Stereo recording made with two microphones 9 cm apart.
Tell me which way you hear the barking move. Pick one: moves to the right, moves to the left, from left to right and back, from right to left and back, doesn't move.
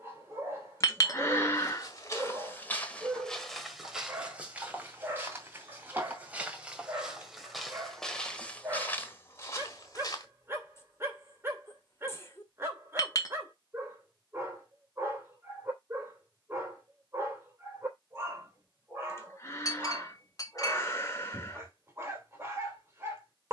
doesn't move.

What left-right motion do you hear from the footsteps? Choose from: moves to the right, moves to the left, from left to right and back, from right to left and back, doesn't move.
from left to right and back.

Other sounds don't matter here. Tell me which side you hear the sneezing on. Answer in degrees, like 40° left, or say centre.
30° left.